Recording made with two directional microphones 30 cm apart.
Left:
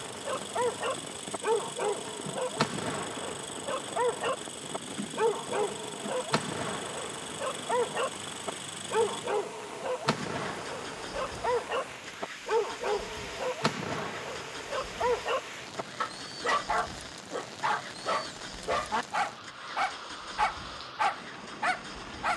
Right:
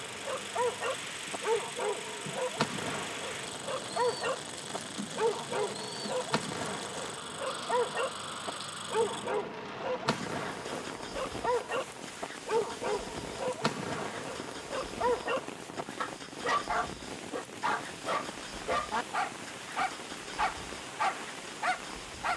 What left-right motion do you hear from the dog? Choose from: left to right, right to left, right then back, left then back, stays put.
stays put.